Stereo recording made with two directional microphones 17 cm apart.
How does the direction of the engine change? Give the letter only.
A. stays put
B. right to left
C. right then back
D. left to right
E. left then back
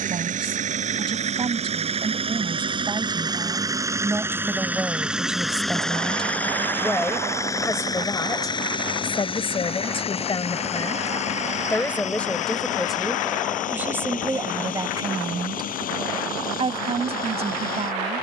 B.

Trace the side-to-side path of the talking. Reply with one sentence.
You can hear the talking move from right to left and back again.